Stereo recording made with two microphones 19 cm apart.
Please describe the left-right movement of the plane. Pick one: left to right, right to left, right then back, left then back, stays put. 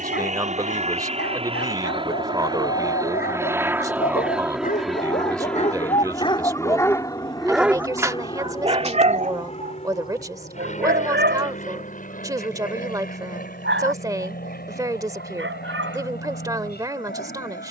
right to left.